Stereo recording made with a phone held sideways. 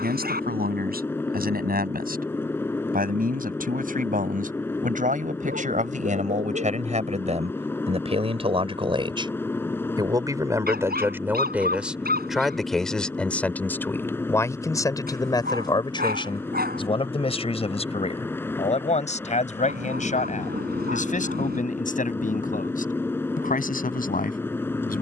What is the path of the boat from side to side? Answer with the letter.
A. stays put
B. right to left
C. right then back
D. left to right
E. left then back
A.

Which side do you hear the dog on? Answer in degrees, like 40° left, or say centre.
70° right.